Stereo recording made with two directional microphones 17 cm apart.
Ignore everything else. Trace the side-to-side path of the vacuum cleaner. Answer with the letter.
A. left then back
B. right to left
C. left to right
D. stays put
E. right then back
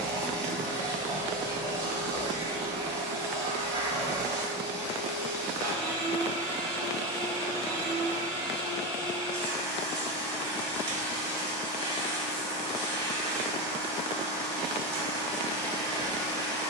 D.